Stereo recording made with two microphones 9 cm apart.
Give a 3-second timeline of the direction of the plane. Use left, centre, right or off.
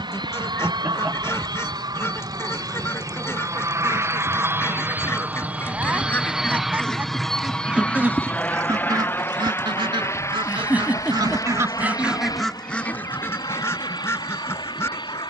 right, right, centre, left, left.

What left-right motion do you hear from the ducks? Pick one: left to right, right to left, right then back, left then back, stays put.
right then back.